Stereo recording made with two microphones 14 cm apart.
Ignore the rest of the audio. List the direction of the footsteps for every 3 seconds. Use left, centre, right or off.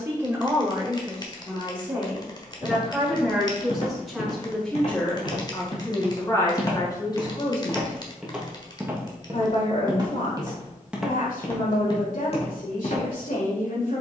left, left, centre, centre, left.